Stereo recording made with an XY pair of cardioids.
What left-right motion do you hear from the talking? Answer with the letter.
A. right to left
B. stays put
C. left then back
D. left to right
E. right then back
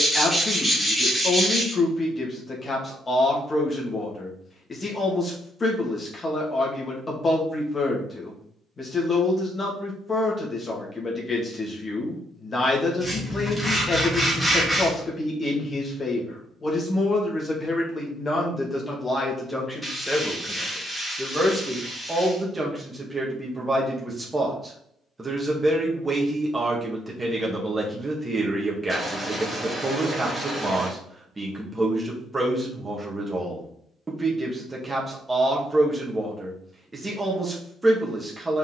D.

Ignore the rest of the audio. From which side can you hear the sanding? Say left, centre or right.
centre.